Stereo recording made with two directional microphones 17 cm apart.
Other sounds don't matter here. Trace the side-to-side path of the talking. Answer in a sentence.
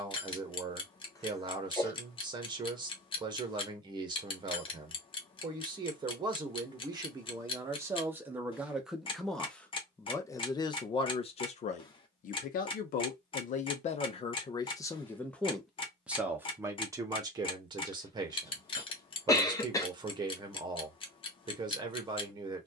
In this clip you hear the talking go left and come back.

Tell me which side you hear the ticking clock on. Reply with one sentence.
You can hear the ticking clock on the left.